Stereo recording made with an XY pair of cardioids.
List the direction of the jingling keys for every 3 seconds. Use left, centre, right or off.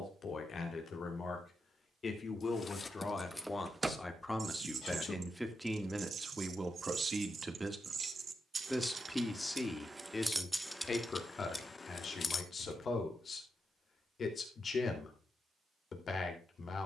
left, right, right, centre, left, off.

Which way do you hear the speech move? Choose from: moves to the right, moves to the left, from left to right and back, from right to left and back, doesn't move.
from left to right and back.